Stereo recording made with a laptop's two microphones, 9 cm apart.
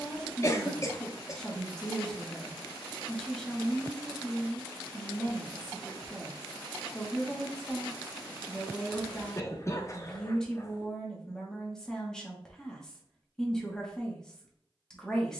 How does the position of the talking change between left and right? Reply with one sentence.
You can hear the talking stay put.